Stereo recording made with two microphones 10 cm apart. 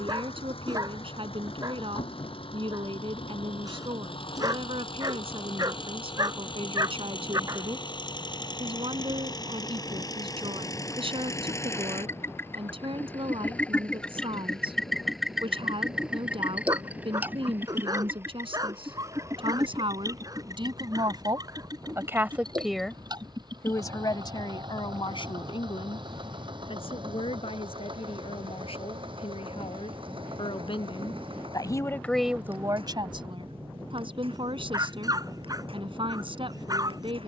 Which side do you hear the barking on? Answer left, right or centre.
right.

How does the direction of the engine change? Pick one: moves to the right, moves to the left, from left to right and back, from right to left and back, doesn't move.
moves to the right.